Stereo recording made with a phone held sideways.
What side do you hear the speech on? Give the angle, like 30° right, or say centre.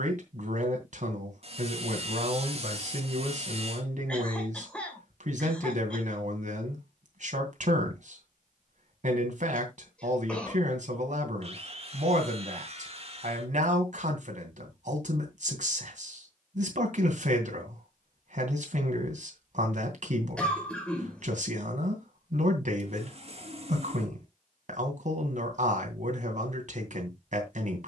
60° right.